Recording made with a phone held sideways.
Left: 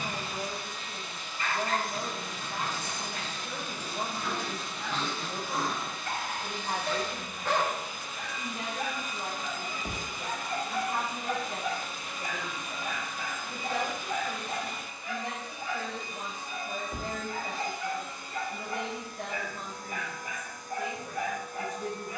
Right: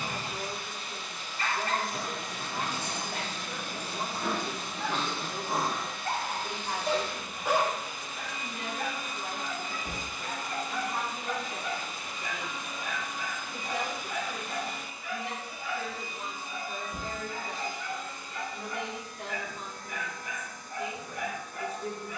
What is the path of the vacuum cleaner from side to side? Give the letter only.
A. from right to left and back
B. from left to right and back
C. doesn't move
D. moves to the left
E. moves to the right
D.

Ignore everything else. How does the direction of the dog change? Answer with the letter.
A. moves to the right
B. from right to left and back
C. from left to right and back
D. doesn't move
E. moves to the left
E.